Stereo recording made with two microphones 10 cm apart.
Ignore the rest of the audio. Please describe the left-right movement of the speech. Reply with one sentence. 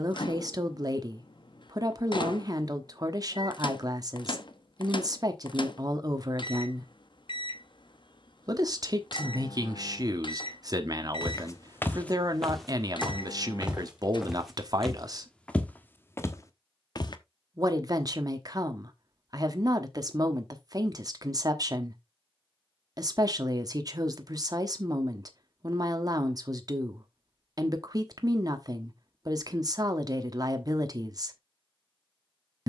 In this clip you hear the speech stay in one place.